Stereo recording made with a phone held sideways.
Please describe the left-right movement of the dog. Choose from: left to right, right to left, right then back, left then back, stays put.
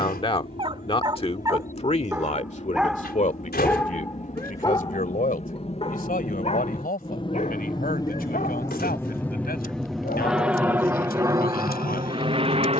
right to left.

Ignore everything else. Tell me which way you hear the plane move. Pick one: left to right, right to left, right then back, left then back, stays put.
left to right.